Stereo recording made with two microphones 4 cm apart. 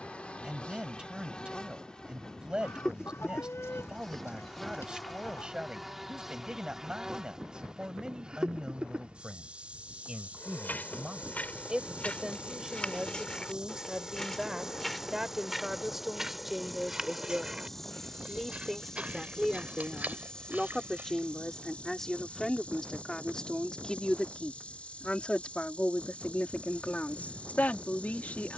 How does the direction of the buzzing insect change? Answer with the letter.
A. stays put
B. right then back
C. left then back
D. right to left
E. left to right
B.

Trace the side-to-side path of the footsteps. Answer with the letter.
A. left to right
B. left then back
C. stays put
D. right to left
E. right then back
A.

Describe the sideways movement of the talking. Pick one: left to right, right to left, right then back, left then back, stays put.
right to left.